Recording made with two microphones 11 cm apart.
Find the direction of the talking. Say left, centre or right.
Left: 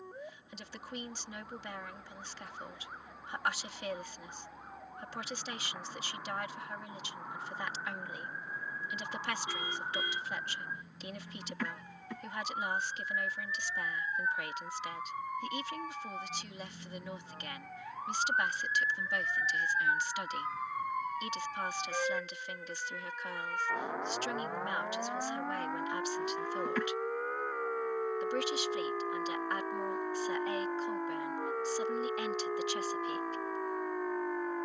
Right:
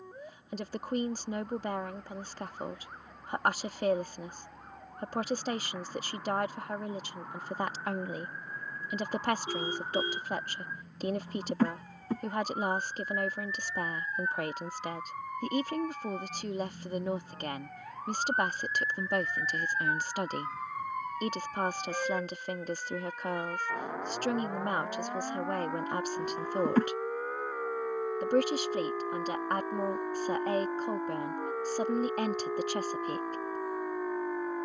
right.